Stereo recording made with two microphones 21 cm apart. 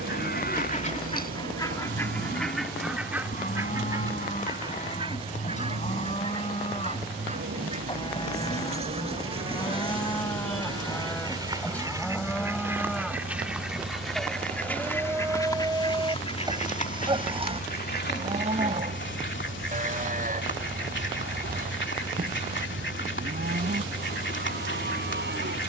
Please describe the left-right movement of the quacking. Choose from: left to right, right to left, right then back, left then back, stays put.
right then back.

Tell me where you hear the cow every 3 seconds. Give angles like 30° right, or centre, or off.
40° left, 40° left, 30° left, 10° left, centre, 20° right, 40° right, 50° right, 60° right.